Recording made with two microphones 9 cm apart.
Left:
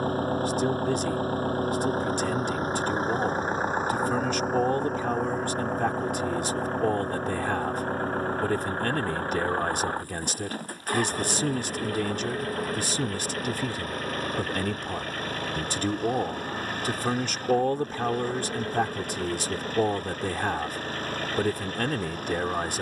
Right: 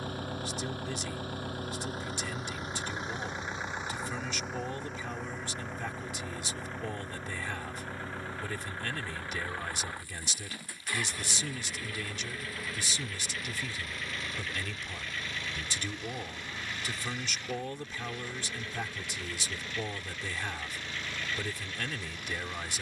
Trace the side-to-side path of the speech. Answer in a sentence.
You can hear the speech stay in one place.